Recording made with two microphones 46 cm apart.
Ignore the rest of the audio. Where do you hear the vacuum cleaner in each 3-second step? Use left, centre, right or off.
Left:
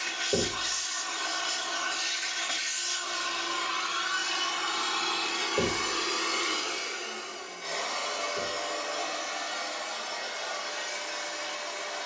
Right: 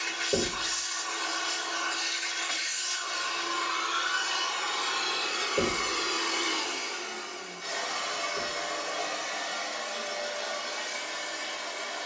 left, left, right, right.